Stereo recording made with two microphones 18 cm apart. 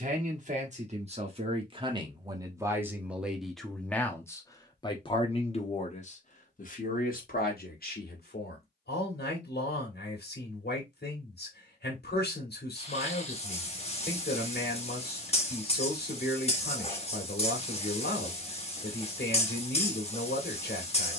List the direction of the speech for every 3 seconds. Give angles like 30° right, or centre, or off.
30° right, 20° left, 50° left, 60° left, 60° left, 60° left, 60° left.